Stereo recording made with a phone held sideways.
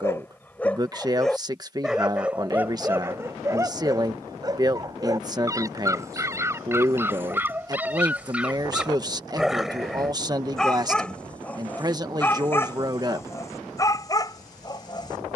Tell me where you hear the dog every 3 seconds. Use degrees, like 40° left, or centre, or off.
centre, 20° right, 10° right, centre, 20° left.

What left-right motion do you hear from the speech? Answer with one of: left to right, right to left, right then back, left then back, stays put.
stays put.